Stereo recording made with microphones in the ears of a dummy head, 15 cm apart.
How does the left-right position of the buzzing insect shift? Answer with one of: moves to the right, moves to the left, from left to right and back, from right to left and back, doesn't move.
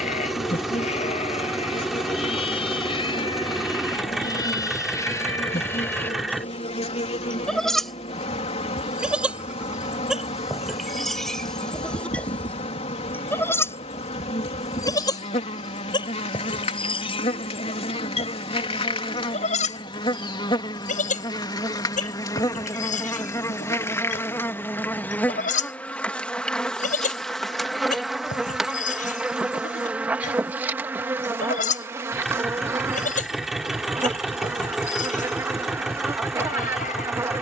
moves to the right.